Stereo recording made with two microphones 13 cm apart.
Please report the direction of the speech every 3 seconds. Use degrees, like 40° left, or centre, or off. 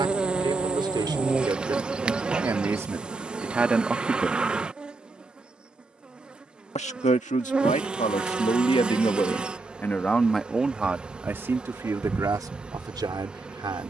30° right, centre, 60° left, centre, 30° right.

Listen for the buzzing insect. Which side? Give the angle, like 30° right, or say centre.
10° right.